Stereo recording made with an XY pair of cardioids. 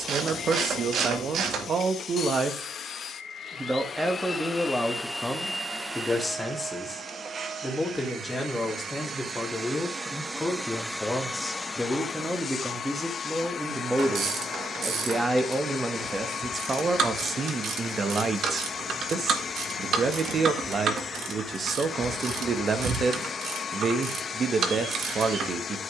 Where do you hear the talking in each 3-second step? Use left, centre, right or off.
right, centre, centre, centre, centre, right, right, right, right.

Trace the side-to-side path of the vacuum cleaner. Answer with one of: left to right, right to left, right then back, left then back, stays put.
right then back.